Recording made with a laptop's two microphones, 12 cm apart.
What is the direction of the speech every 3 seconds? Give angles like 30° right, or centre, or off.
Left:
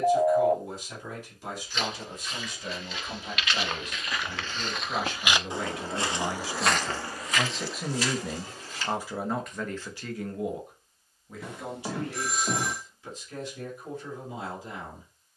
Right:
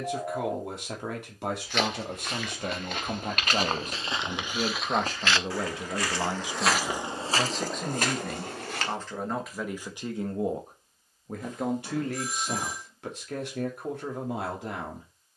70° right, 50° right, centre, 30° right, 70° right.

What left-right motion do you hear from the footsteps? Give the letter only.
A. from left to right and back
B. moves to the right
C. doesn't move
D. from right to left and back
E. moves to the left
D.